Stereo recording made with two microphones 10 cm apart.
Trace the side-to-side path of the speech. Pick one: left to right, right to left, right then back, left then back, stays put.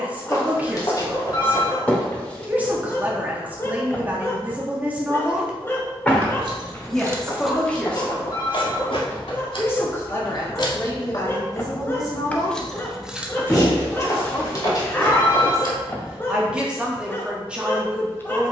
left then back.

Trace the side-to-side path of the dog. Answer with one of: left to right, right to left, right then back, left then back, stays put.
stays put.